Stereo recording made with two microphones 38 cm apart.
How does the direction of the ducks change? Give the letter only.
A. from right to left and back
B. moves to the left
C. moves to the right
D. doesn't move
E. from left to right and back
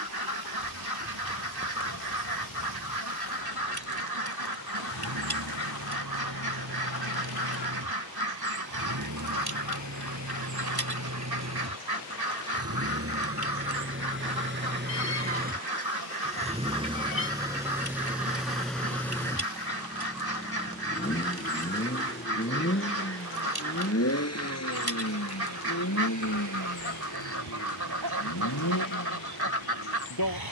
D.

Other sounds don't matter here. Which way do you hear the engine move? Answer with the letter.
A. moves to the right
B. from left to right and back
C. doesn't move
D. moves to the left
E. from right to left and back
D.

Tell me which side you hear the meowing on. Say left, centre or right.
left.